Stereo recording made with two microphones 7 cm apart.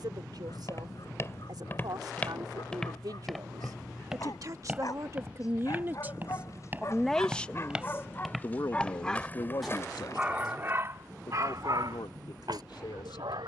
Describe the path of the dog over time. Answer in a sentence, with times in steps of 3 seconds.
In this clip you hear the dog on the left from 0 s and on the right from 9 s.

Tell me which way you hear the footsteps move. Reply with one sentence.
In this clip you hear the footsteps move from left to right and back again.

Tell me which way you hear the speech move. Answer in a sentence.
You can hear the speech move to the left.